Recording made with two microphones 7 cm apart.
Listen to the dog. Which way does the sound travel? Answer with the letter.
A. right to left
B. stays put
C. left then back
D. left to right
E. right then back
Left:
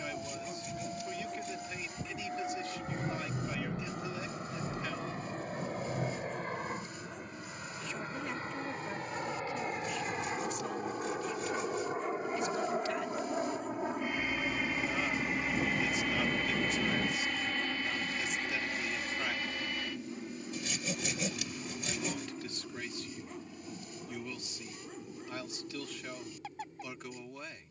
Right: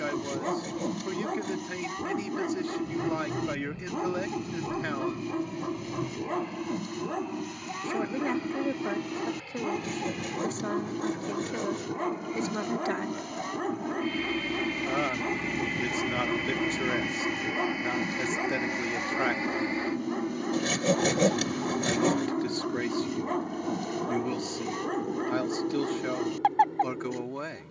B.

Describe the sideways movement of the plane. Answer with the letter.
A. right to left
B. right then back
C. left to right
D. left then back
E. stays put
C.